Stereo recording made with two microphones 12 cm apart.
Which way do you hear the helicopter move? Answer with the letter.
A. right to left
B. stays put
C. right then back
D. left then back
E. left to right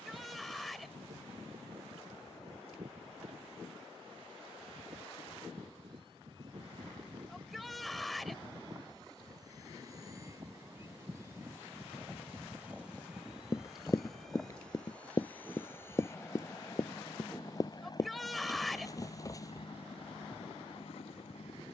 A.